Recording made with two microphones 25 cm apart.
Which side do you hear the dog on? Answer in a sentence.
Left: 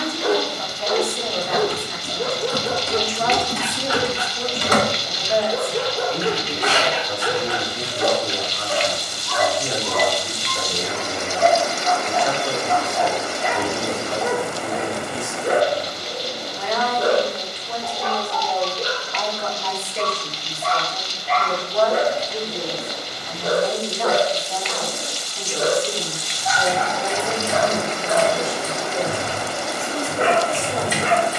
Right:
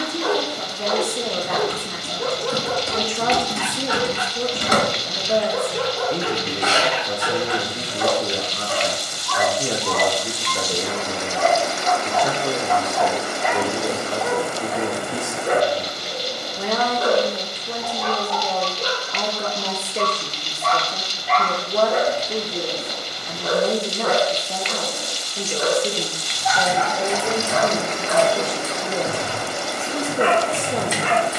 In this clip you hear the dog on the left.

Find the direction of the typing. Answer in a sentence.
In this clip you hear the typing on the right.